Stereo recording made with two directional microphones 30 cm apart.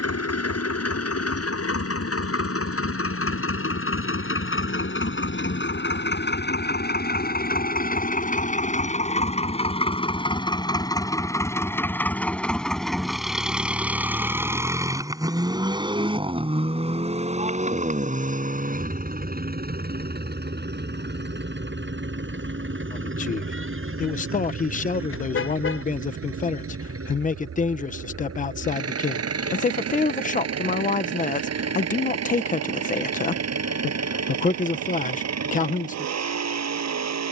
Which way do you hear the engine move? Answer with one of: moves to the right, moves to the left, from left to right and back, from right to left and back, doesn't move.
moves to the right.